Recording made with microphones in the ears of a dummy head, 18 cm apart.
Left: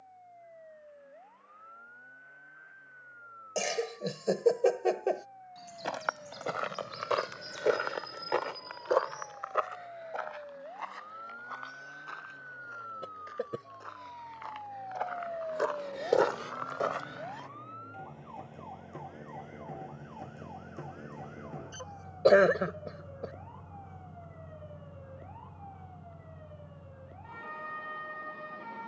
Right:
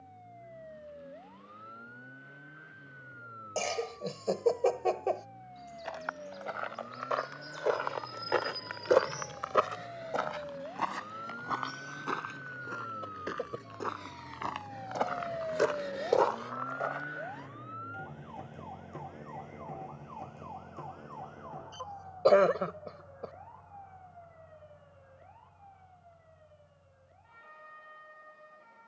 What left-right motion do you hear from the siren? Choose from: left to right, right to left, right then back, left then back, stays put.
right to left.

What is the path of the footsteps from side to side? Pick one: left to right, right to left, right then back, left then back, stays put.
right then back.